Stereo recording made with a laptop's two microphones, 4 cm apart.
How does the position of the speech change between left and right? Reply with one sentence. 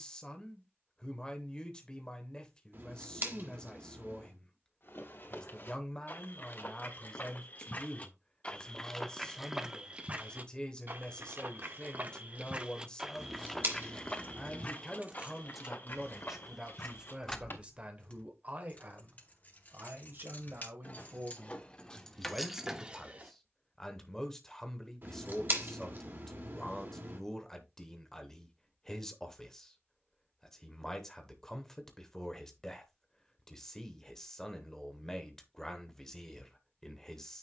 You can hear the speech move from left to right and back again.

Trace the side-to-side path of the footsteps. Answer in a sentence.
You can hear the footsteps go right and come back.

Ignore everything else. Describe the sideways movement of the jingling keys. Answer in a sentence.
In this clip you hear the jingling keys go left and come back.